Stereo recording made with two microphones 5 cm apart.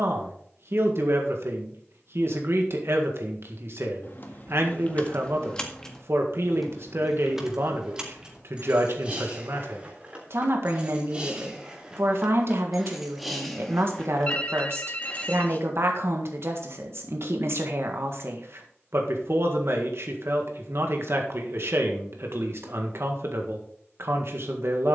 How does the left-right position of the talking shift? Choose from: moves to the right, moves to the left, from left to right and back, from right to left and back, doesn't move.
doesn't move.